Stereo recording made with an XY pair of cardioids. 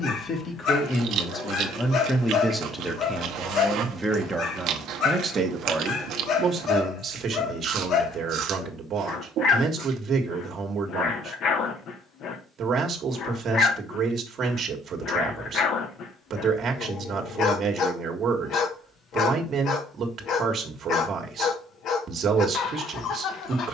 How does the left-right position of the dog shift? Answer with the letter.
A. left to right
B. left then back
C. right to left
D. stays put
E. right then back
D.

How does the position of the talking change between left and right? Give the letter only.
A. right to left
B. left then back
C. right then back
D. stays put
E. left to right
E.